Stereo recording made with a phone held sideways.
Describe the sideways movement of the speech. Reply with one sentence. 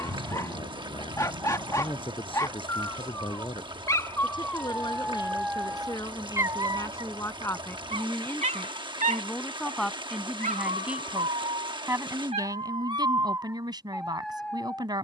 In this clip you hear the speech move from left to right.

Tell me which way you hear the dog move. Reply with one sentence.
You can hear the dog go right and come back.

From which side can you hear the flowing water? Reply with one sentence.
You can hear the flowing water on the right.